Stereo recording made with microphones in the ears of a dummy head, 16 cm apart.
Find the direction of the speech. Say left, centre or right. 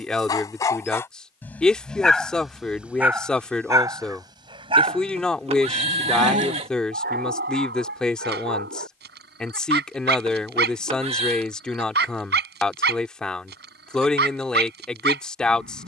centre.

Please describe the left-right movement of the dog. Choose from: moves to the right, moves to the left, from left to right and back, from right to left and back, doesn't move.
moves to the right.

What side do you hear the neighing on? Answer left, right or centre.
right.